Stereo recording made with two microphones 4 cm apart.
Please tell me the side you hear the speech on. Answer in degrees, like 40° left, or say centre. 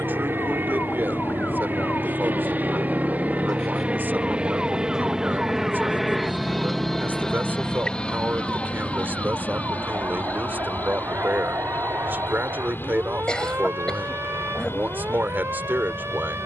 50° right.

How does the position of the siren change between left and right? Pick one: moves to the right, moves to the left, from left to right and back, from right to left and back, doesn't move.
moves to the right.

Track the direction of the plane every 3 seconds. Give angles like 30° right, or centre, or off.
50° right, 20° right, 20° left, 40° left, 50° left, 60° left.